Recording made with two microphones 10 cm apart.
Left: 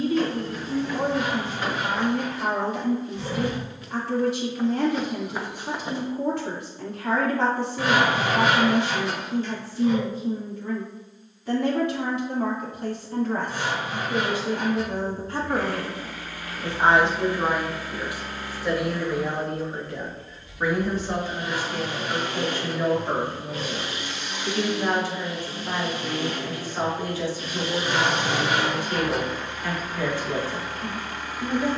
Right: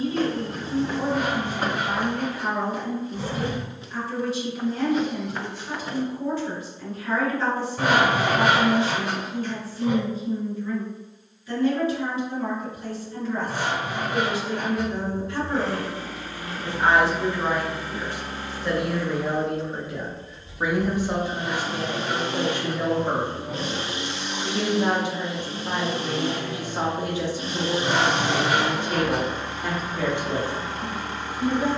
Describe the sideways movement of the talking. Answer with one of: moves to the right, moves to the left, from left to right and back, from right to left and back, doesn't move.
moves to the right.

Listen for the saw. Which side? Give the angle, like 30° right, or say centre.
50° right.